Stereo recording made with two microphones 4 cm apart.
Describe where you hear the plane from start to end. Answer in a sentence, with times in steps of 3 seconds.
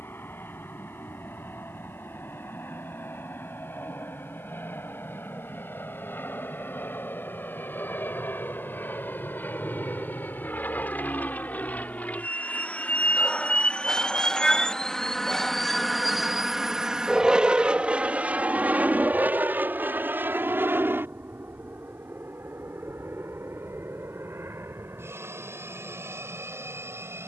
You can hear the plane on the left from 0 s, in the centre from 15 s and on the right from 18 s.